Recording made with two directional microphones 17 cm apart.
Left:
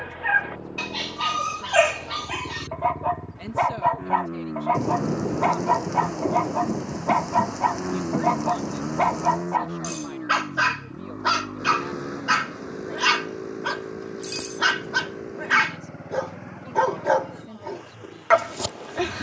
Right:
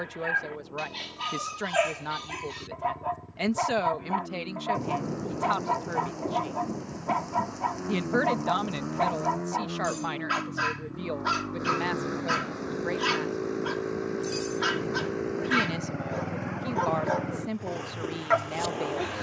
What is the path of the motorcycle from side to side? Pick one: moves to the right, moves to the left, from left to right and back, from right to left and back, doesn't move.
moves to the right.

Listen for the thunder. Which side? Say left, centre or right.
left.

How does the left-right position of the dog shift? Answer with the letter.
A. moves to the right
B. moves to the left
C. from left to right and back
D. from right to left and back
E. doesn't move
E.